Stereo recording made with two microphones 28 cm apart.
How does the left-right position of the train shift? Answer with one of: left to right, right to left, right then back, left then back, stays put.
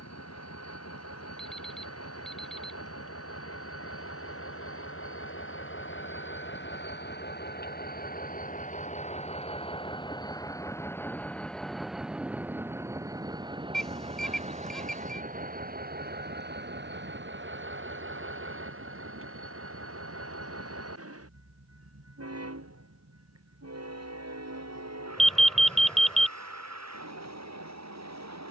left to right.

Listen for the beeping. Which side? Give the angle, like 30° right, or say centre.
centre.